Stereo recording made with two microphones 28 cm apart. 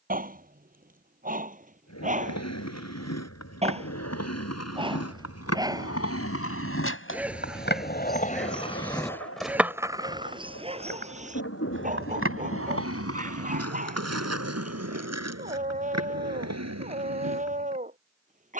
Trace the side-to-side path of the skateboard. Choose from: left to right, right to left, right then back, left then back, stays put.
left to right.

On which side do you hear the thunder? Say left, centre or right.
left.